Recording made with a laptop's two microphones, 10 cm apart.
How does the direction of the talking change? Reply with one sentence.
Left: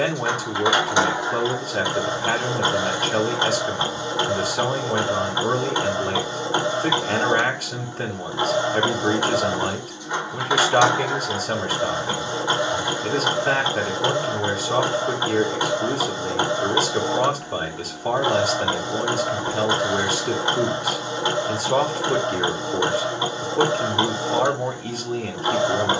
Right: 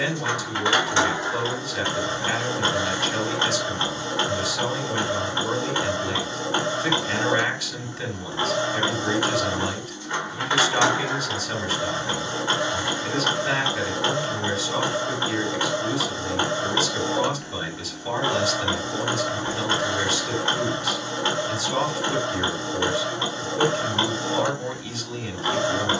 In this clip you hear the talking stay in one place.